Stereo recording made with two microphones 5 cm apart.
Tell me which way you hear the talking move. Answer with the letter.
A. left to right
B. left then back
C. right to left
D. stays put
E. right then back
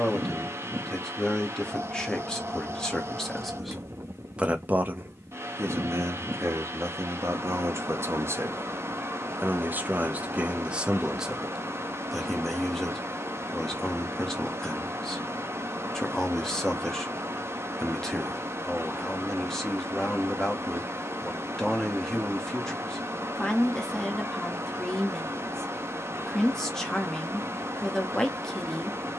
E.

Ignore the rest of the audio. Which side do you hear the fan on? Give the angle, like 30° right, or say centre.
60° right.